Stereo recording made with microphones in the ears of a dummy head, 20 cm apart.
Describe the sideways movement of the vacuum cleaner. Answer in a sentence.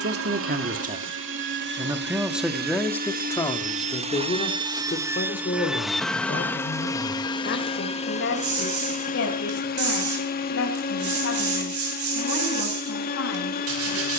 In this clip you hear the vacuum cleaner move from right to left.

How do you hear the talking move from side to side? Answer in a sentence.
In this clip you hear the talking travel towards the left.